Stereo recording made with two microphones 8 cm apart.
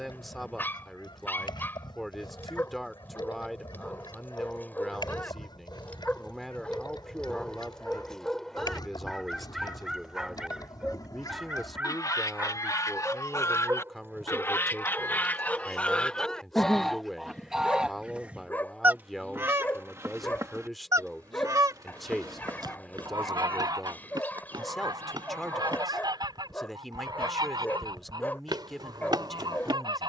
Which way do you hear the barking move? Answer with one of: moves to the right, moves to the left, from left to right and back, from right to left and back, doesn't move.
from left to right and back.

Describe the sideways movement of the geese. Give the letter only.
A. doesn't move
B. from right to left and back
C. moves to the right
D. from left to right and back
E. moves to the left
C.